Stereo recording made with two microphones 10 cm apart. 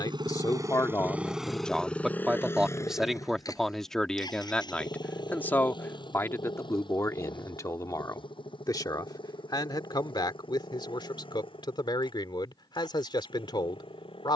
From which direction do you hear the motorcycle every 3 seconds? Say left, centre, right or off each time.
centre, left, left, left, left.